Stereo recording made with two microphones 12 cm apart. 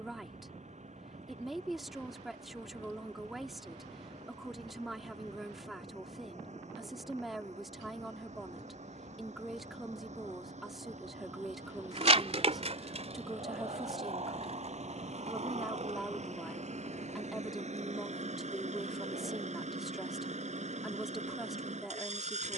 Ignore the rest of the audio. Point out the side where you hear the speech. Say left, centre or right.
centre.